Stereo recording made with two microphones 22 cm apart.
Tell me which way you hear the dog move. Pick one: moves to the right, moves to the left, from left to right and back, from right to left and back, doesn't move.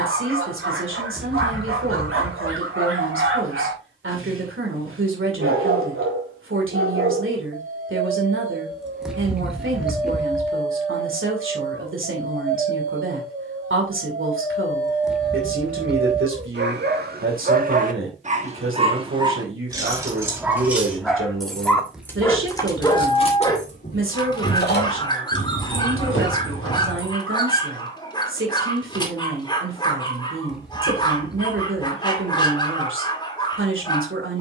moves to the left.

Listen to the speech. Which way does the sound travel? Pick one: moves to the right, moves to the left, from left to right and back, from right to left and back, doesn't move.
doesn't move.